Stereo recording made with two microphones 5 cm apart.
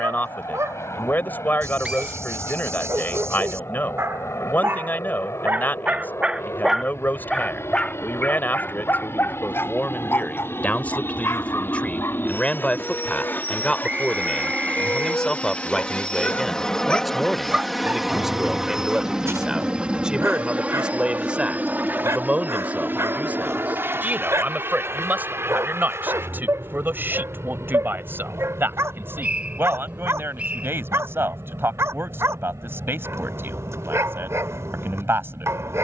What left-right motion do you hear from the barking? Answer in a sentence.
You can hear the barking go left and come back.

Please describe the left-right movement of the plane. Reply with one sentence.
In this clip you hear the plane move to the right.